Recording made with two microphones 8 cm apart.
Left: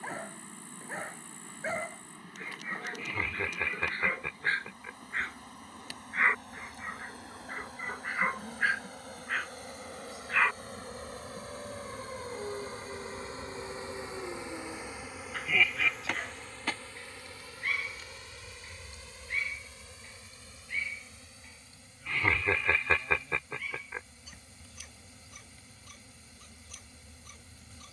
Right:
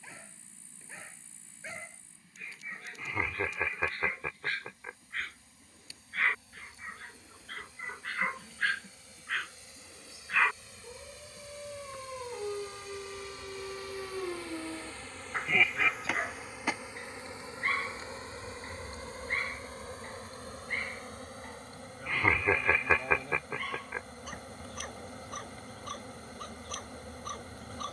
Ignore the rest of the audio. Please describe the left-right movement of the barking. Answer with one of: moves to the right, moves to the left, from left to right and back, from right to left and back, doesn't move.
moves to the right.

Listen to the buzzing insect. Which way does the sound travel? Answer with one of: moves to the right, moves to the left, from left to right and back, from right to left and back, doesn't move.
moves to the right.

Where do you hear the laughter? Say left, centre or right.
centre.